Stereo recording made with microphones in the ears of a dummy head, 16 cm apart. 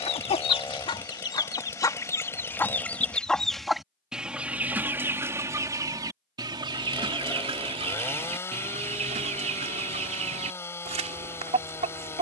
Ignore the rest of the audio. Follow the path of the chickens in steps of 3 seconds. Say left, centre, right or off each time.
left, centre, right, right.